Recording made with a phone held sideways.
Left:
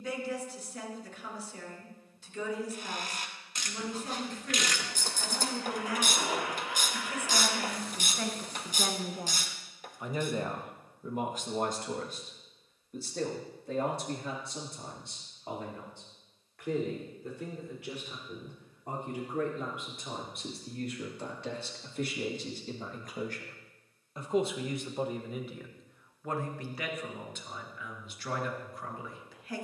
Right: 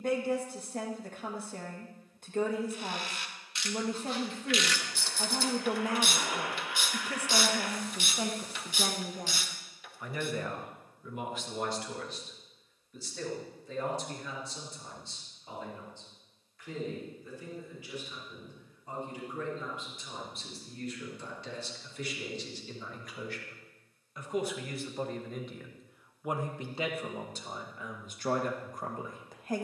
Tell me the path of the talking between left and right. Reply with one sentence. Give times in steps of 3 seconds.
You can hear the talking on the right from 0 s, on the left from 9 s, in the centre from 24 s and on the right from 27 s.